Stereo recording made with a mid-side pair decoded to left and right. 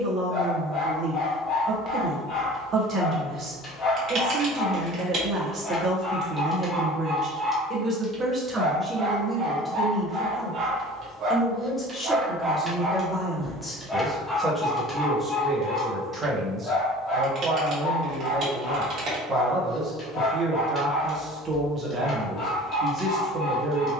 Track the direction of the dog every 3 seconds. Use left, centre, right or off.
left, left, centre, right, centre, left, left, left.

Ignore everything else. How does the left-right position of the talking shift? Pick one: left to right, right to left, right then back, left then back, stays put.
left then back.